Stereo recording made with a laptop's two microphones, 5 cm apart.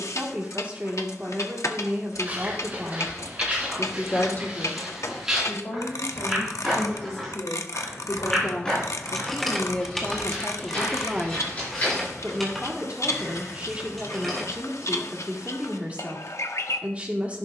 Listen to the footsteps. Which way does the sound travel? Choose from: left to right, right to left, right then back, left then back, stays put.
right to left.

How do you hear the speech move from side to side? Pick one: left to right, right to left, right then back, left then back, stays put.
left then back.